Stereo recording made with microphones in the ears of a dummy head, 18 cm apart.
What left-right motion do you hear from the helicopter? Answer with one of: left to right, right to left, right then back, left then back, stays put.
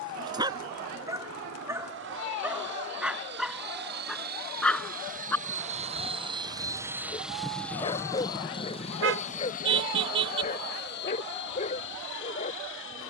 right to left.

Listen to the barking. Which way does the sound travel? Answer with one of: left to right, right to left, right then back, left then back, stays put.
right to left.